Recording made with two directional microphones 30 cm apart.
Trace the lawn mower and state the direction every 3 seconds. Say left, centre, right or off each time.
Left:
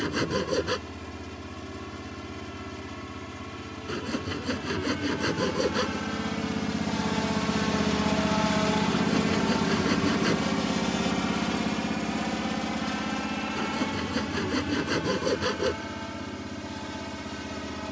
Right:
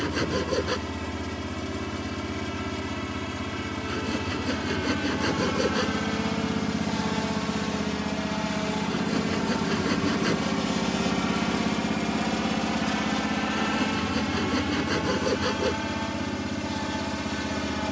right, right, centre, centre, right, right.